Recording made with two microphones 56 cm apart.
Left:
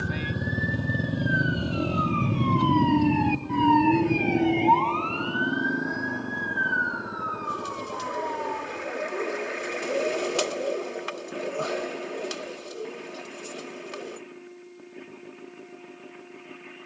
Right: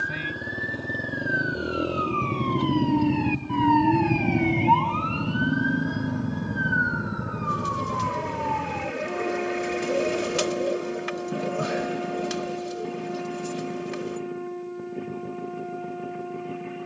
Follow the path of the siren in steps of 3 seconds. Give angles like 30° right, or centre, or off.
50° left, 20° right, 60° right, 70° right, 80° right, 80° right.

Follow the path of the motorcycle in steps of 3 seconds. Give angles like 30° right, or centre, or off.
20° left, 20° right, 40° right, 50° right, 60° right, 60° right.